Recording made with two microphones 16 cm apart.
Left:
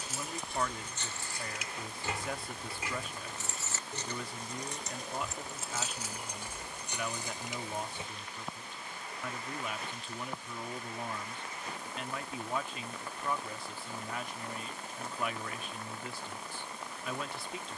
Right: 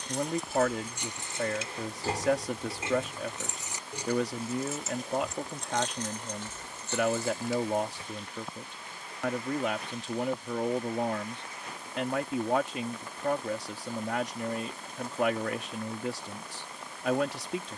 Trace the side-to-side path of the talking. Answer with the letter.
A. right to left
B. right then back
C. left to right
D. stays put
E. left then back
D.